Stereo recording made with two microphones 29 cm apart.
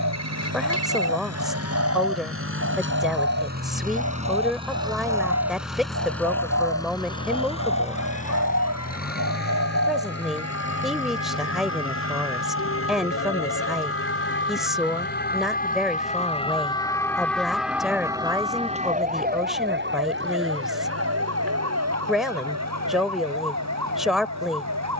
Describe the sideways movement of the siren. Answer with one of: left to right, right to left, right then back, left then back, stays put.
left to right.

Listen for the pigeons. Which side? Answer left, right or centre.
right.